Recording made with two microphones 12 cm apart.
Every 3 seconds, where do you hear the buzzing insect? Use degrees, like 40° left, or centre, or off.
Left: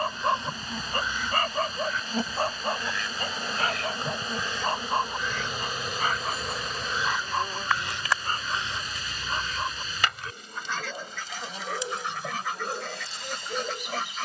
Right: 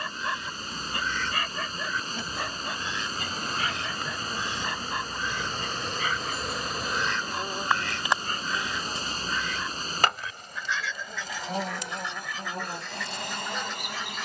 40° left, 20° left, 10° right, 50° right, 60° right.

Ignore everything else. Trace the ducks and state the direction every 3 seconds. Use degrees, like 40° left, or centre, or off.
10° left, 20° right, 10° left, 50° left, 60° left.